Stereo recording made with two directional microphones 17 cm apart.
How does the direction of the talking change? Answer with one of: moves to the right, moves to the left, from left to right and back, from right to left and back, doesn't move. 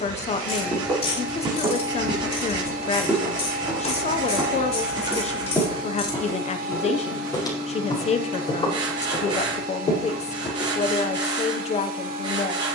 doesn't move.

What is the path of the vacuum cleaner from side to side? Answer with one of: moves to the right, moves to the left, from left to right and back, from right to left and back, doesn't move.
doesn't move.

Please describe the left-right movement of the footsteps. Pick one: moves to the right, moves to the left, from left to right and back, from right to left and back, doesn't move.
moves to the left.